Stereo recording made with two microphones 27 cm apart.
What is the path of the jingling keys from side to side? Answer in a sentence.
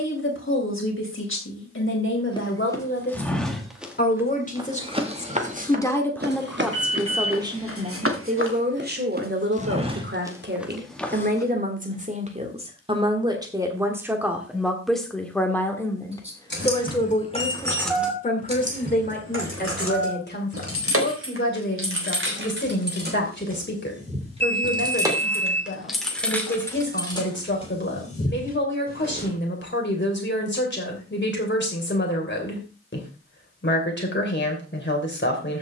You can hear the jingling keys move from left to right and back again.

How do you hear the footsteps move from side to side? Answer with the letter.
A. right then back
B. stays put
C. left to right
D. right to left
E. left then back
A.